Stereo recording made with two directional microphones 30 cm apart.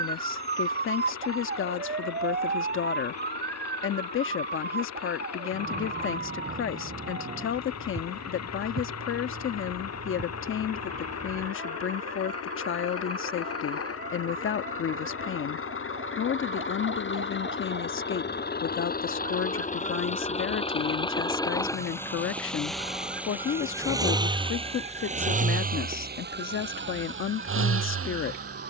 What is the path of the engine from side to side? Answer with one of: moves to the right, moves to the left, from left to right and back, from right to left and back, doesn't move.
moves to the right.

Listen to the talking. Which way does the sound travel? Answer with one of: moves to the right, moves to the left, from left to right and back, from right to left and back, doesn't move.
doesn't move.